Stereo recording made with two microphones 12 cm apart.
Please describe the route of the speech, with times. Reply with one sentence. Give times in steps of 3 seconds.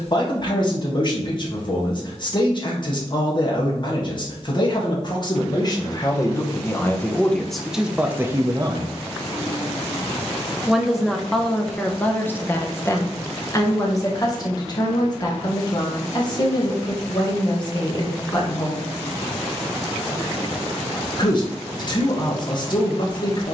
In this clip you hear the speech on the left from 0 s, in the centre from 6 s and on the left from 12 s.